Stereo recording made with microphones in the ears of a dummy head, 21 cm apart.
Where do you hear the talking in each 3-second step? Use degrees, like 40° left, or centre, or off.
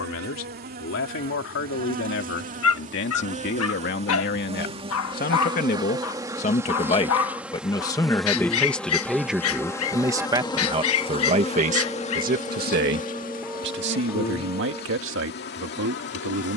60° left, 50° left, 20° left, 20° right, 50° right, 60° right.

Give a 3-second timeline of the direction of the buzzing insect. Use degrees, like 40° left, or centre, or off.
40° right, 30° right, 10° right, 20° left, 40° left, 50° left.